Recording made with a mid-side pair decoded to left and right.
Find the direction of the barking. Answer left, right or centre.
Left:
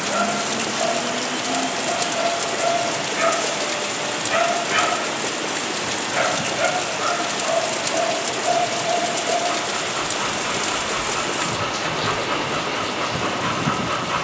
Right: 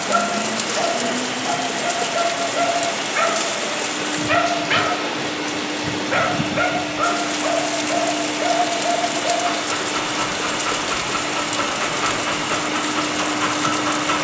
right.